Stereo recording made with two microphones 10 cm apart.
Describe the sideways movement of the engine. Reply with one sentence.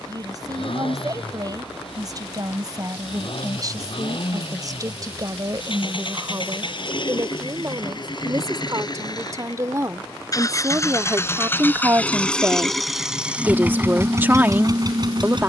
You can hear the engine move from left to right.